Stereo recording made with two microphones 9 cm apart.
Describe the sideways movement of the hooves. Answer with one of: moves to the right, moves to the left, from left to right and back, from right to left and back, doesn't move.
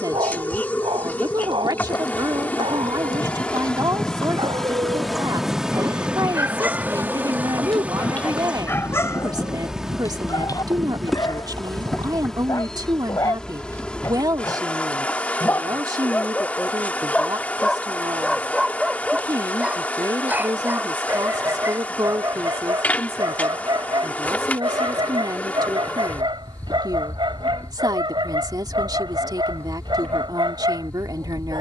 moves to the right.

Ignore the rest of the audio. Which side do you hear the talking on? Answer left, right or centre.
right.